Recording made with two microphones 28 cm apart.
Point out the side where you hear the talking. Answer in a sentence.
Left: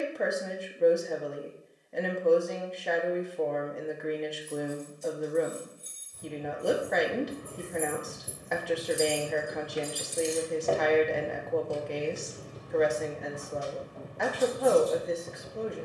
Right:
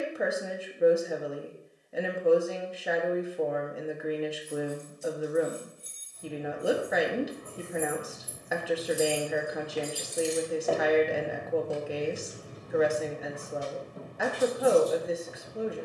In this clip you hear the talking in the centre.